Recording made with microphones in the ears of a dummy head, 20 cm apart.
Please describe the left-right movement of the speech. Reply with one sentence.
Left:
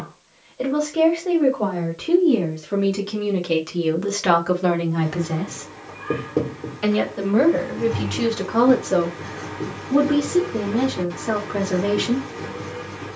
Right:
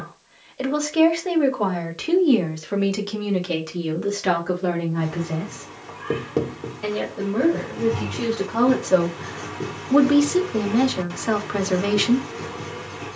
You can hear the speech go left and come back.